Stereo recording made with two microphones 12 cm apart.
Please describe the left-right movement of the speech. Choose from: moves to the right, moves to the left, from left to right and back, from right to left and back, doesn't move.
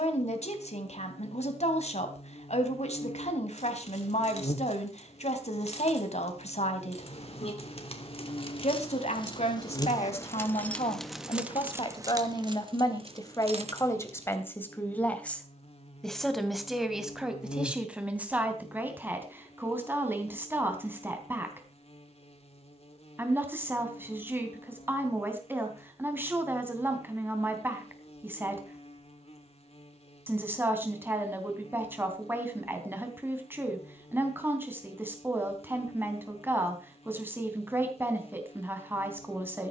moves to the right.